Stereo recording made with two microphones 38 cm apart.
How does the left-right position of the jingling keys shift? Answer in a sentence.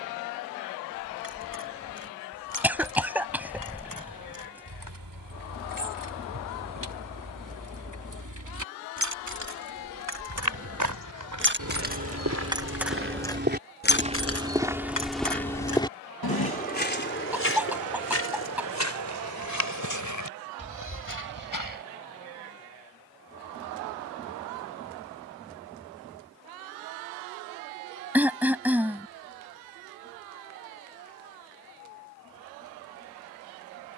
You can hear the jingling keys go from the right side to the left.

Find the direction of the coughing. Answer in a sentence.
In this clip you hear the coughing in the centre.